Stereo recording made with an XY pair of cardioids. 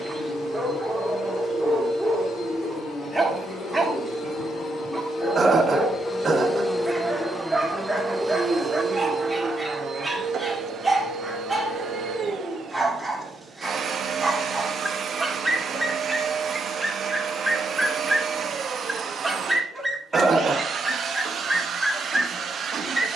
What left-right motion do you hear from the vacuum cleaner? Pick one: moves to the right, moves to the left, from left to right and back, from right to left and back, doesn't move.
moves to the right.